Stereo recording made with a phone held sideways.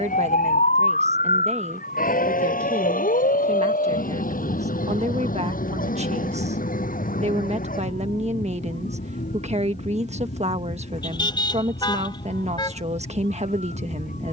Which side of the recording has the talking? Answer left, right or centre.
right.